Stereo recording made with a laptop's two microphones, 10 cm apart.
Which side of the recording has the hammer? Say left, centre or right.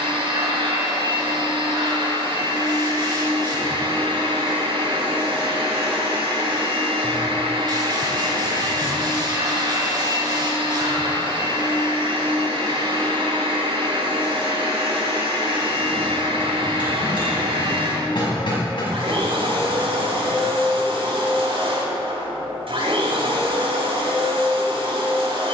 left.